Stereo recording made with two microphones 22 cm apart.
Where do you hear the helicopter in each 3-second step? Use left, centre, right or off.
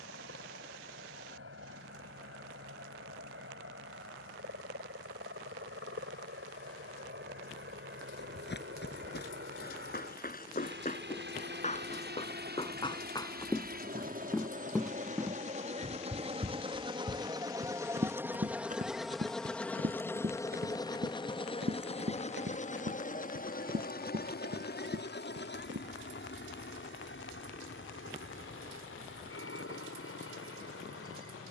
right, right, right, right, right, right, centre, left, left, left, left.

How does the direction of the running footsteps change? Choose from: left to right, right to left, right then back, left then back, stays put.
left to right.